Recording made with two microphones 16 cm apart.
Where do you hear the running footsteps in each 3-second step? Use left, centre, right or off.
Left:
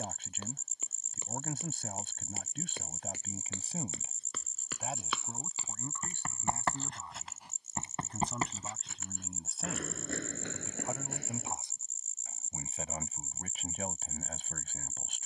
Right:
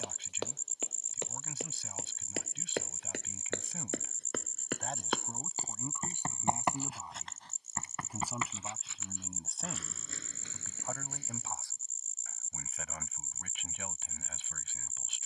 right, right, centre, left, off.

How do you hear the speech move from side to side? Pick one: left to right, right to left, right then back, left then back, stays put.
right then back.